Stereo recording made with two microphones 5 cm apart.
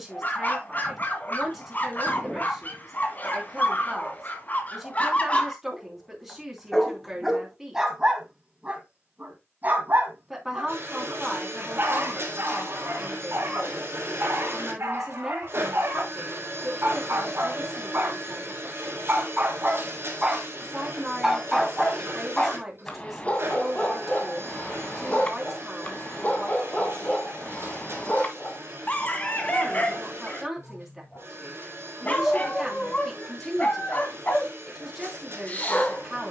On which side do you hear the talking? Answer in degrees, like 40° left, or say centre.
10° right.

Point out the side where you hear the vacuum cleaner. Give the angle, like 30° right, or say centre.
60° right.